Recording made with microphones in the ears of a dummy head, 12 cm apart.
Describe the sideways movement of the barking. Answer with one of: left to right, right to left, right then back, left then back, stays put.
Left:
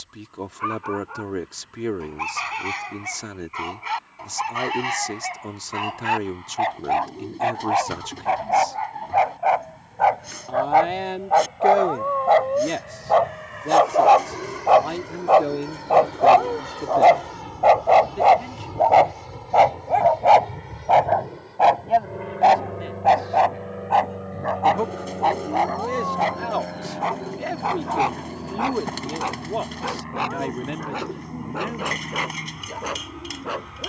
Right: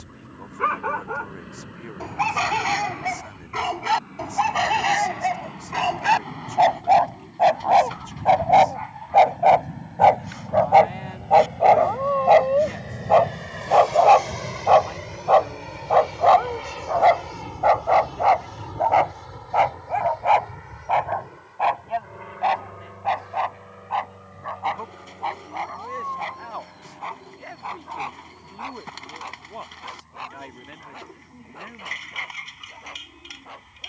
right to left.